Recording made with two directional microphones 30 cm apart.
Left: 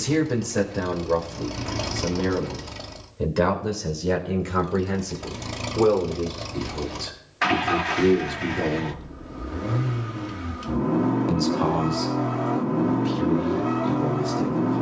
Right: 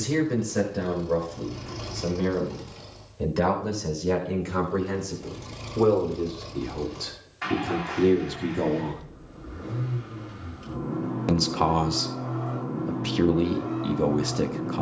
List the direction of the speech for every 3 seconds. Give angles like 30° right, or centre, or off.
20° left, 10° left, centre, 40° right, 60° right.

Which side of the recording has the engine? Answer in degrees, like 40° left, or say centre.
70° left.